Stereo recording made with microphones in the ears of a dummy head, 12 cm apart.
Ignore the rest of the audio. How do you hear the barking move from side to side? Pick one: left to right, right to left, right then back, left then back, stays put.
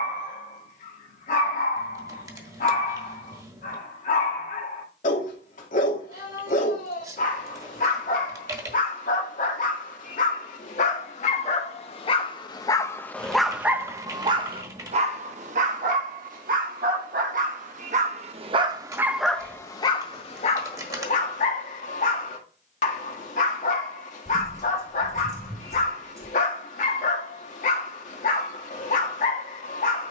right then back.